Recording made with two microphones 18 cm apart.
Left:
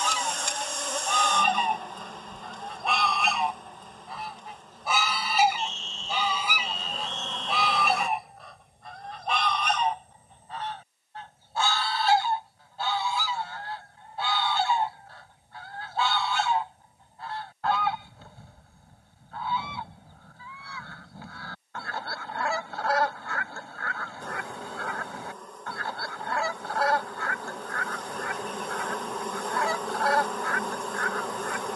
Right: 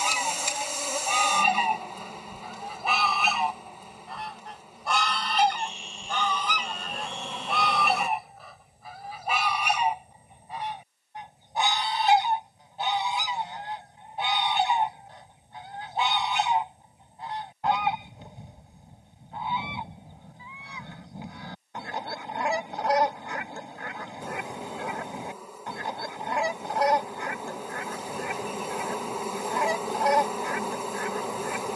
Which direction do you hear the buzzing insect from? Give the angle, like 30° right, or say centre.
10° right.